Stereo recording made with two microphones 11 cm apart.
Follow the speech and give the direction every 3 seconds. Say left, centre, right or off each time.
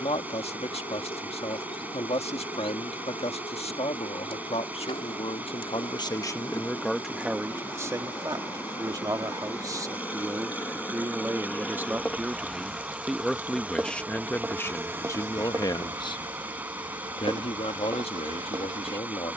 left, left, centre, right, centre, left, left.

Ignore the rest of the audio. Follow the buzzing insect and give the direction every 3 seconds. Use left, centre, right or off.
left, left, left, left, centre, right, right.